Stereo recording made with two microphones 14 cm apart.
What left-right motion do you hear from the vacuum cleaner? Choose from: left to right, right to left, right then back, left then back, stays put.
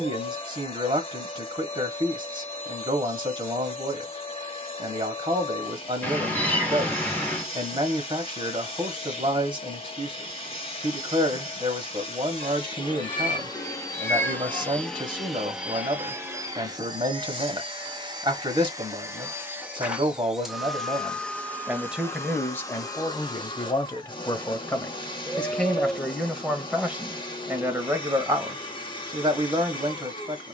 right then back.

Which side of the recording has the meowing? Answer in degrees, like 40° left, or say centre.
10° left.